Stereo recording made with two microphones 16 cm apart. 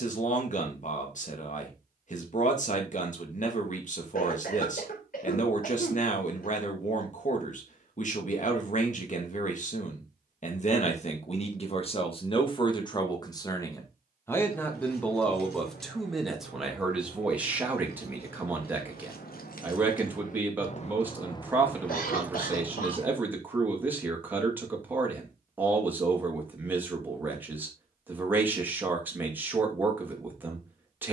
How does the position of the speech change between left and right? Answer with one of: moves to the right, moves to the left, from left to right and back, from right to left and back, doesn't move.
moves to the right.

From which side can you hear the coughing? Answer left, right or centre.
left.